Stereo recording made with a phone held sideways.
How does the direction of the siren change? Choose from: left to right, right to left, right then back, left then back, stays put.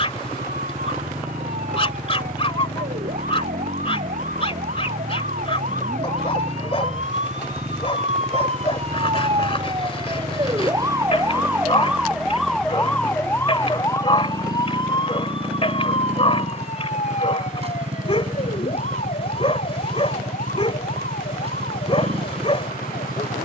right to left.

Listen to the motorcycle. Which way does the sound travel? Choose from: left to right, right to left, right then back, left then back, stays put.
stays put.